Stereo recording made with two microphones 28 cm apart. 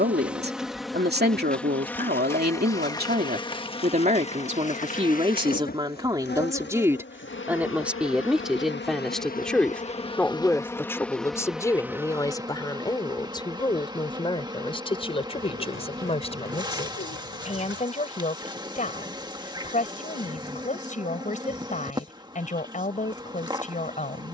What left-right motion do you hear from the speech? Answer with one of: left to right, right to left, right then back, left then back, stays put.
right to left.